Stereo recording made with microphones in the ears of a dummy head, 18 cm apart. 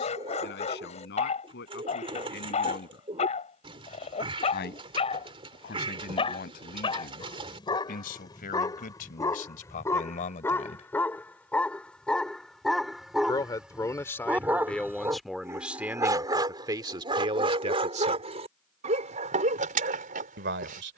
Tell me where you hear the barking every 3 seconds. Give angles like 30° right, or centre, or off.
30° left, 30° left, 20° left, 10° left, centre, 20° right, 40° right.